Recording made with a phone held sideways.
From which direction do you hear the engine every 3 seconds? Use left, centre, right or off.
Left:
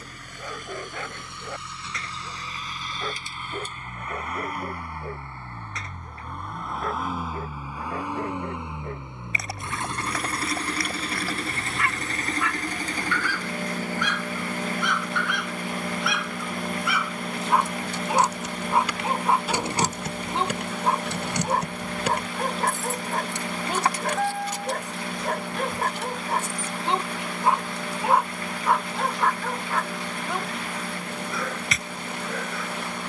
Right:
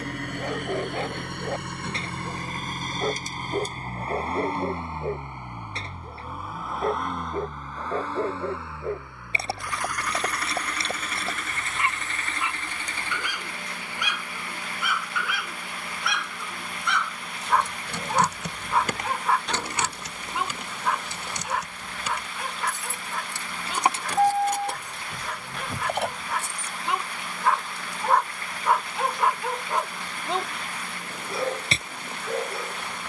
right, right, centre, left, left, left, left, left, left, left, left.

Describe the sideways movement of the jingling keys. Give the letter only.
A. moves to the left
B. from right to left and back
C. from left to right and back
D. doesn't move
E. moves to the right
B.